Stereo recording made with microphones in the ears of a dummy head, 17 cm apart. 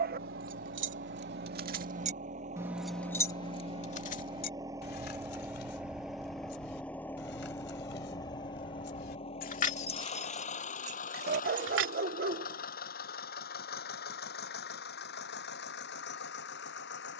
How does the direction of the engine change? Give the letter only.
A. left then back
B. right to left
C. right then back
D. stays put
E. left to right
B.